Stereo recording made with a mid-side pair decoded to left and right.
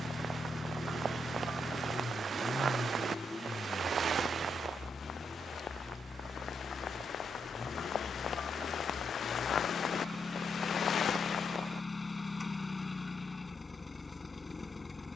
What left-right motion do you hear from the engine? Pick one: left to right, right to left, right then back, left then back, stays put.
stays put.